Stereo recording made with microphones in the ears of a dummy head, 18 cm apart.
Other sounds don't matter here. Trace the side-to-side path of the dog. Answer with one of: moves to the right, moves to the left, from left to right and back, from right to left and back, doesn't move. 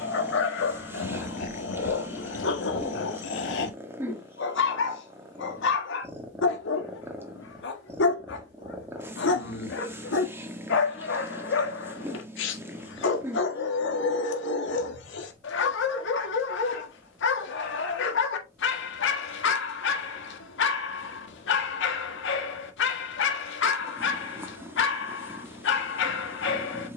doesn't move.